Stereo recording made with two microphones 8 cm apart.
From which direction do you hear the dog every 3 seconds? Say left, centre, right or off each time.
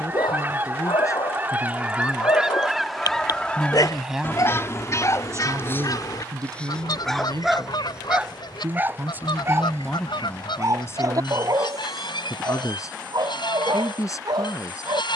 left, left, centre, right, right.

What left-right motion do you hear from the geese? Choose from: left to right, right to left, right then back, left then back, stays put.
right to left.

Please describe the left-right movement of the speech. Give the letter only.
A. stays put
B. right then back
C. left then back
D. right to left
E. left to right
B.